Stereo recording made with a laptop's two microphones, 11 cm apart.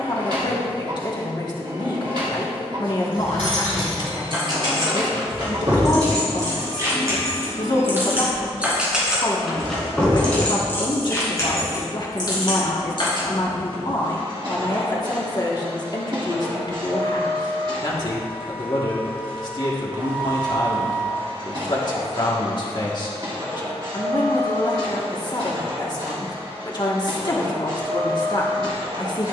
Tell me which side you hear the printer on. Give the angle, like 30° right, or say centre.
50° right.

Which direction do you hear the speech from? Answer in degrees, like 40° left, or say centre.
40° left.